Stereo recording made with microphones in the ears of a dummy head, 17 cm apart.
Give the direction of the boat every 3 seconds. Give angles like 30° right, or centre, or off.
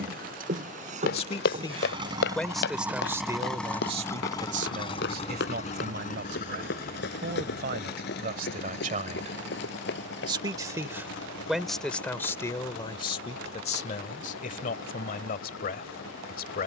30° right, 20° left, 50° left, 70° left, 70° left, 70° left.